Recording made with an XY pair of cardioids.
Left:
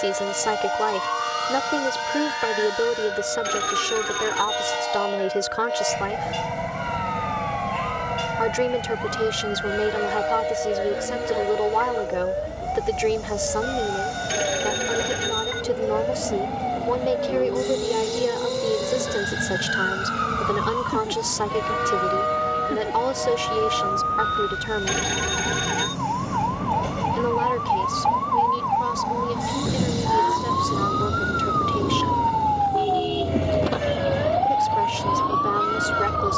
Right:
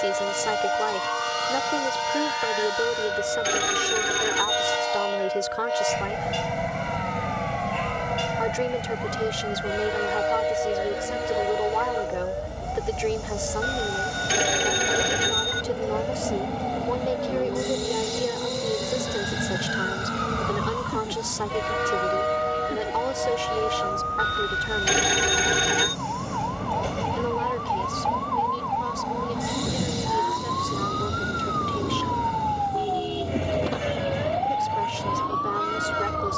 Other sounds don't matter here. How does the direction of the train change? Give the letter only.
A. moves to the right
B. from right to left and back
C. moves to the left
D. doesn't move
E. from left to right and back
D.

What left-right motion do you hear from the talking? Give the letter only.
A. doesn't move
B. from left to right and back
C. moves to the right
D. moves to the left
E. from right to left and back
A.